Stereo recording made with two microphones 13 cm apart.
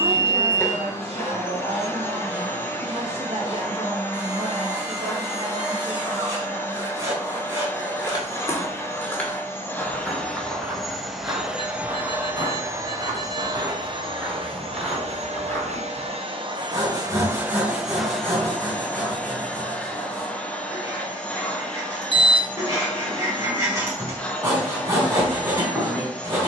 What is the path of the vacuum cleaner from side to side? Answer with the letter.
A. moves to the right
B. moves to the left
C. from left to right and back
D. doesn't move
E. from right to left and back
C.